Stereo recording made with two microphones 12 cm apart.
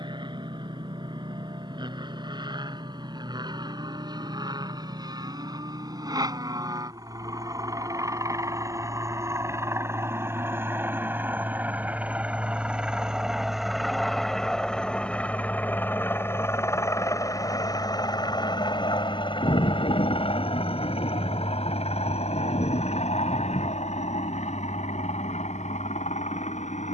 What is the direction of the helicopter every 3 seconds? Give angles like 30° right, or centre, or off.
50° right, 40° right, 40° right, 20° right, centre, 20° left, 40° left, 60° left, 70° left.